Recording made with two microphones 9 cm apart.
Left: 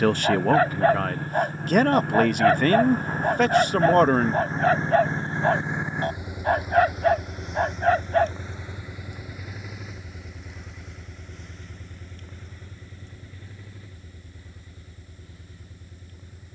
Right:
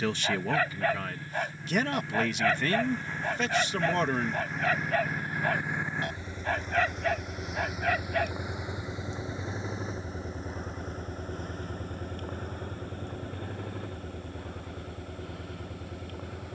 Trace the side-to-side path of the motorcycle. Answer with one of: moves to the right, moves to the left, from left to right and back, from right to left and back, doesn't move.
moves to the right.